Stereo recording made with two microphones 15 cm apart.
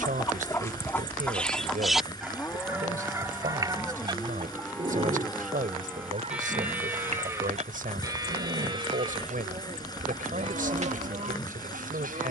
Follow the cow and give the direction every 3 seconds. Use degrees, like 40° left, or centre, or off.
10° left, 10° left, 20° right, 40° right.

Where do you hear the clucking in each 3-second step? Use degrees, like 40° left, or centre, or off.
10° left, 30° right, 50° right, 60° right.